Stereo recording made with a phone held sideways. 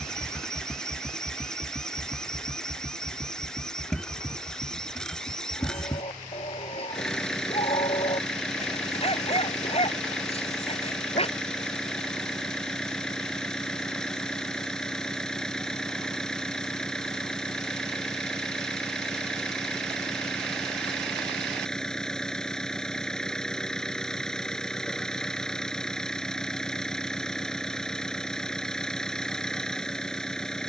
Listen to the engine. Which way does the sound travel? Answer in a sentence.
In this clip you hear the engine stay in one place.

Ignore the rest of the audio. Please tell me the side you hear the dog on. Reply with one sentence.
In this clip you hear the dog on the left.